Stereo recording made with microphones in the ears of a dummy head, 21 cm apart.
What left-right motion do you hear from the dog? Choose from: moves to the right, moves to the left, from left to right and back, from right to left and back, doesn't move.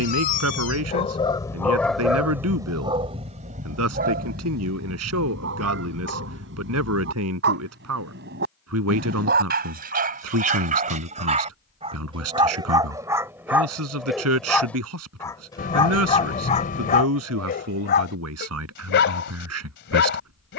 from left to right and back.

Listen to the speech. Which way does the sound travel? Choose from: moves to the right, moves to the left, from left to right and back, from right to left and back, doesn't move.
doesn't move.